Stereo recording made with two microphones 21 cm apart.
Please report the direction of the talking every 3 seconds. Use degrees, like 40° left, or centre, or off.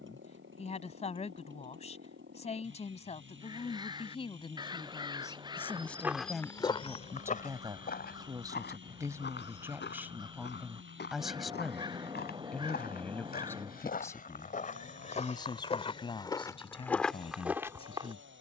30° left, 20° left, 10° right, 10° right, 10° left, 20° left.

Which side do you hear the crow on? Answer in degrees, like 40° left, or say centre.
20° right.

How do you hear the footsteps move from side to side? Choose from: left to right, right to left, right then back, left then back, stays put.
left then back.